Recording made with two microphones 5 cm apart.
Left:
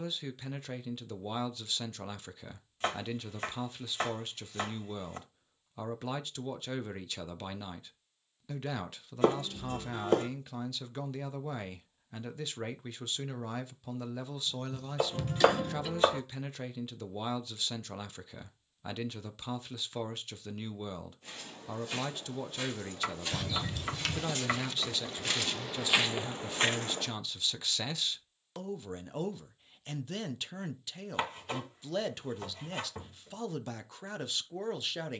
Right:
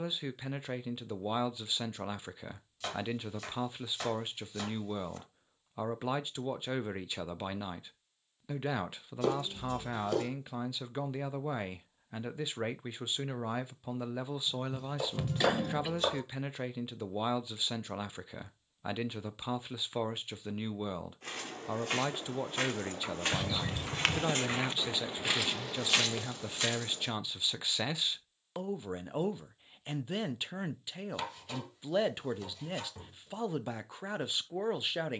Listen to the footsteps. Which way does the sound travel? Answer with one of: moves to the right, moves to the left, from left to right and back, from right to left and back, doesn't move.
moves to the left.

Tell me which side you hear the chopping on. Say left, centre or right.
left.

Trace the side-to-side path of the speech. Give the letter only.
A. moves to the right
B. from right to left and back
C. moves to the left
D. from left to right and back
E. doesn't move
E.